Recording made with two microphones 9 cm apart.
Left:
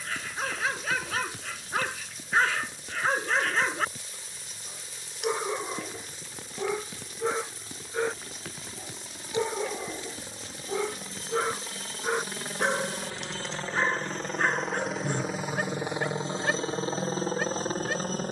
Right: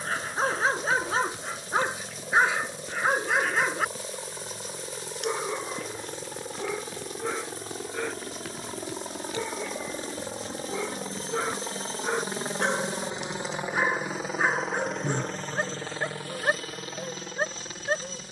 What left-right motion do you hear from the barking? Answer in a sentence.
In this clip you hear the barking go left and come back.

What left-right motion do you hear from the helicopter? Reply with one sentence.
You can hear the helicopter go from the right side to the left.